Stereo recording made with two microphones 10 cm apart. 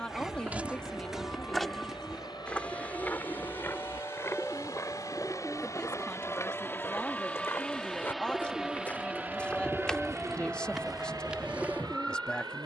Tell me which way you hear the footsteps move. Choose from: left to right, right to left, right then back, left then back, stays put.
left then back.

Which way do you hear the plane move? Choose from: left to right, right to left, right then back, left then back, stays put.
left to right.